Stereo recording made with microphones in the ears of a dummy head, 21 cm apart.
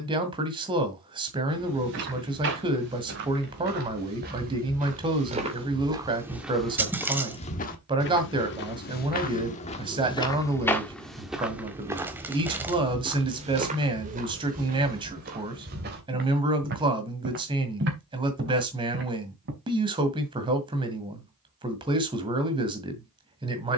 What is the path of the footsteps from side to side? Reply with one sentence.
You can hear the footsteps go left and come back.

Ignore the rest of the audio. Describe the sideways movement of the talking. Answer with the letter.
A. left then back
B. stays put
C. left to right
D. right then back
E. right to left
B.